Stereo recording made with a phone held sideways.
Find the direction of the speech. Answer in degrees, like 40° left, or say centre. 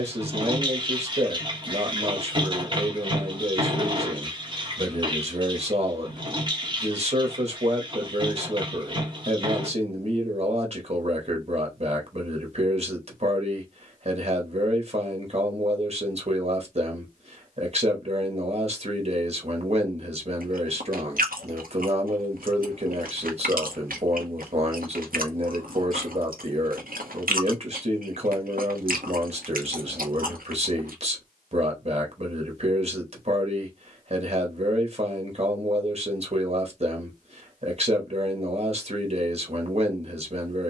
50° right.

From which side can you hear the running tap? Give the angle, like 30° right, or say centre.
30° right.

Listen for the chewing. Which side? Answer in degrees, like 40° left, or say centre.
70° right.